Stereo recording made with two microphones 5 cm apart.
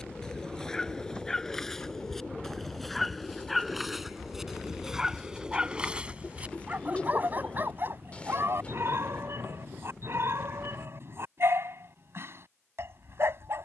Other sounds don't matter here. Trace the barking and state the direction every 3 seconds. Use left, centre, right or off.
centre, centre, right, right, right.